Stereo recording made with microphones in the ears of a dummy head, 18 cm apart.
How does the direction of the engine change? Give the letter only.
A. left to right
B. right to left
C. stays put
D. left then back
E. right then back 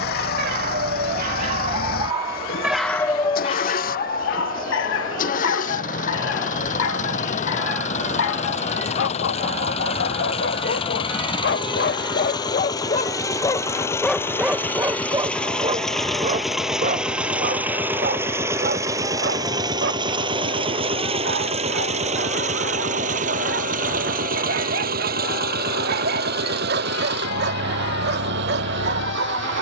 A.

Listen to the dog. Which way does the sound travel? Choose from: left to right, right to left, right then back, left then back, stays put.
left then back.